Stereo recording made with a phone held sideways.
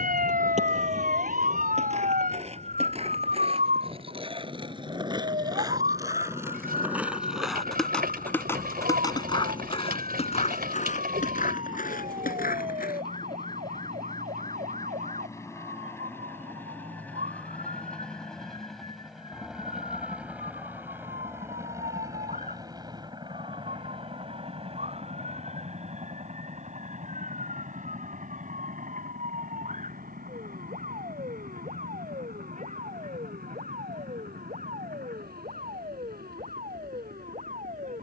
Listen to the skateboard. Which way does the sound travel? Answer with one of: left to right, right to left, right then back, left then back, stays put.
right to left.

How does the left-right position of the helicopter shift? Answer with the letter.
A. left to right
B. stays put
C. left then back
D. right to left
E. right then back
A.